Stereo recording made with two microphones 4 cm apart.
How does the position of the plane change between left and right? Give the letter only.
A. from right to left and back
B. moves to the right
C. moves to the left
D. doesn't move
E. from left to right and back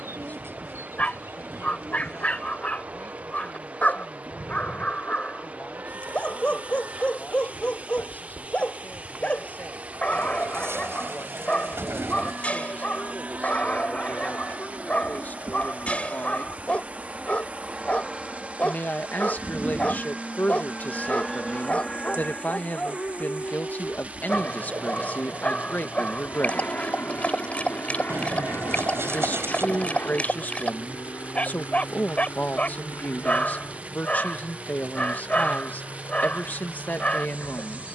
C.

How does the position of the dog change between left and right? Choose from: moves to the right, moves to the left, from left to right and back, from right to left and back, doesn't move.
doesn't move.